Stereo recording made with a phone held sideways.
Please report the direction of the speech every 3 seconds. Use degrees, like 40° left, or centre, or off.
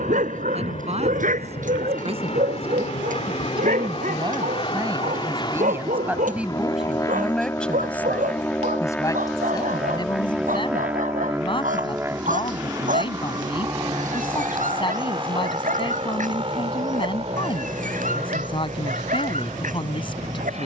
50° right, 30° right, centre, 40° left, 40° left, 40° left, 40° left.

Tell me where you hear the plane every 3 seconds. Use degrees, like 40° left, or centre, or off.
60° left, 40° left, 20° left, 10° right, 30° right, 40° right, 50° right.